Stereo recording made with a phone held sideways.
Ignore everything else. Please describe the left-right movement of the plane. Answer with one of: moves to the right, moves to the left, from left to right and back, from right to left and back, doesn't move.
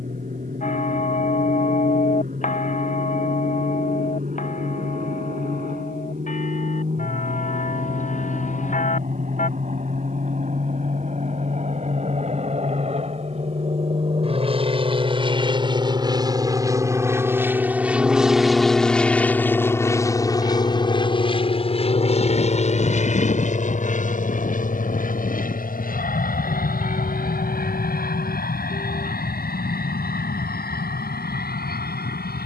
moves to the left.